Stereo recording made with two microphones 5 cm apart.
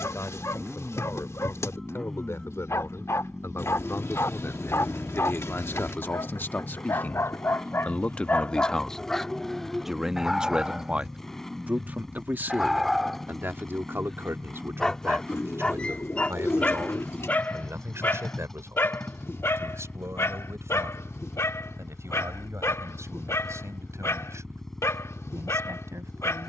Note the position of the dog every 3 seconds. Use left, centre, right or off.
left, left, left, centre, centre, left, left, left, left.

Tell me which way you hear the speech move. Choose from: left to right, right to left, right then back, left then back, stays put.
left to right.